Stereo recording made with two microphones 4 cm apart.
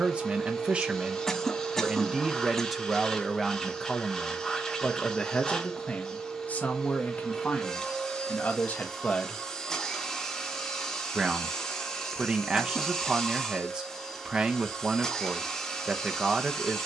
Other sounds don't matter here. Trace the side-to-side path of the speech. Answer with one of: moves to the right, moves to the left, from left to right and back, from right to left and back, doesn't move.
from right to left and back.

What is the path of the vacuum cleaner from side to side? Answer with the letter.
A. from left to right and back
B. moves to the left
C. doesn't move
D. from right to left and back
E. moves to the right
C.